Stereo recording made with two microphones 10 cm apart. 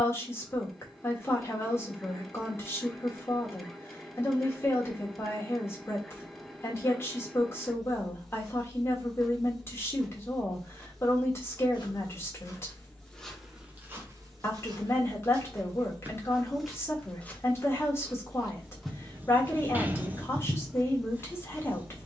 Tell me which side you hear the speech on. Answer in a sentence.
In this clip you hear the speech on the left.